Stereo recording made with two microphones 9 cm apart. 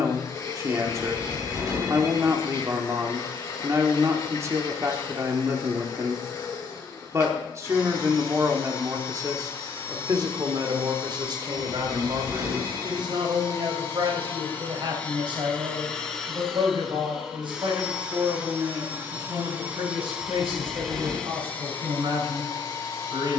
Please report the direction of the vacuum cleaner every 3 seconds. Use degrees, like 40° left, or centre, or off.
40° left, 40° left, 40° left, 40° left, 30° left, centre, 10° right, 30° left.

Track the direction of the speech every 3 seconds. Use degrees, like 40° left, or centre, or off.
30° right, 30° right, 30° right, 50° right, 60° right, 60° right, 60° right, 70° right.